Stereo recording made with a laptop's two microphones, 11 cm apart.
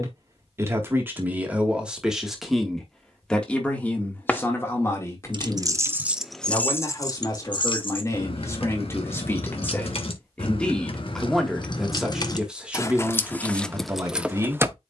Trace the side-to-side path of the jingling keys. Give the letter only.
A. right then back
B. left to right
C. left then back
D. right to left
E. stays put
C.